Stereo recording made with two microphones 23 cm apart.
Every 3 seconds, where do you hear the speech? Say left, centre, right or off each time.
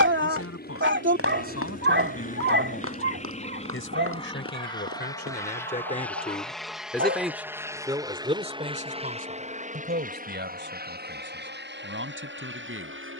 left, left, centre, right, right.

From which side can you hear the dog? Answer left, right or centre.
right.